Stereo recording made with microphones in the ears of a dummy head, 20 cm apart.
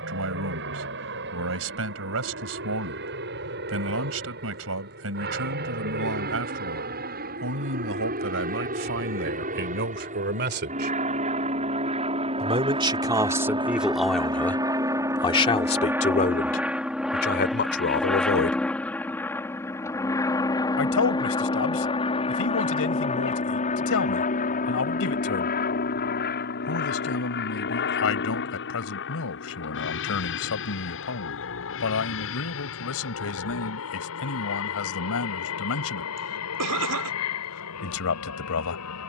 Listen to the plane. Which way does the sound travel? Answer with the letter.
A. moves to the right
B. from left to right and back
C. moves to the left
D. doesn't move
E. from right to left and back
C.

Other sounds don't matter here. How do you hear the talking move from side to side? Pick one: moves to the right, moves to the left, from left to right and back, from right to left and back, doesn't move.
moves to the left.